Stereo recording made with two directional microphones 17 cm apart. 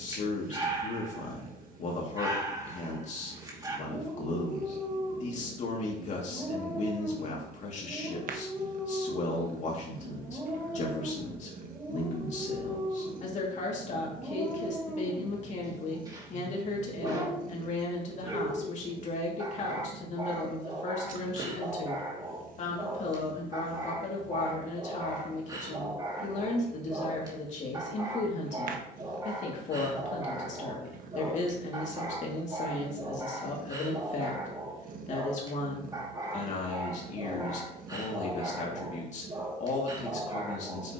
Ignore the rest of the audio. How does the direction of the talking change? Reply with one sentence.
You can hear the talking stay put.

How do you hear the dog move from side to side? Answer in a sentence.
You can hear the dog stay in one place.